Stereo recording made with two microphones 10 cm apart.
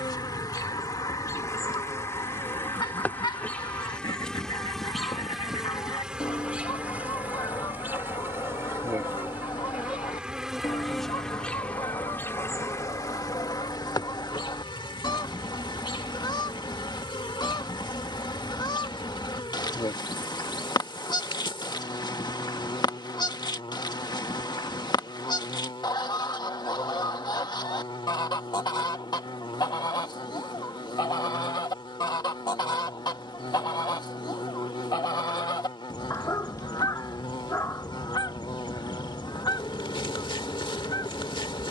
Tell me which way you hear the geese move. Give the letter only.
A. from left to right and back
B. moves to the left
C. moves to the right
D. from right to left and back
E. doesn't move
E.